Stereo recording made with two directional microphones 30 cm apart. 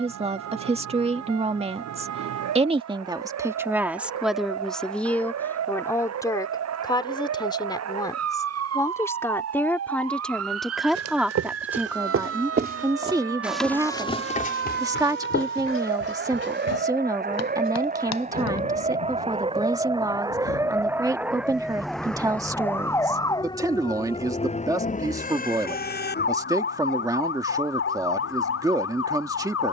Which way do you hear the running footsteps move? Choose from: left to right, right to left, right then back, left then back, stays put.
right to left.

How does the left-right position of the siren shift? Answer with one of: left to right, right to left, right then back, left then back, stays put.
right to left.